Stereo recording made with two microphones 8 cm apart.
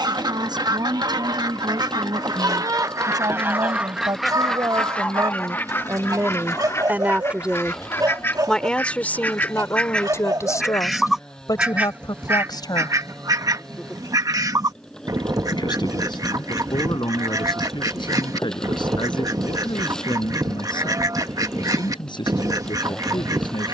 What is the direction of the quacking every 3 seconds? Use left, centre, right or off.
right, centre, left, centre, right, right, right, right.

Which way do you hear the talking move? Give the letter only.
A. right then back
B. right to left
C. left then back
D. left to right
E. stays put
B.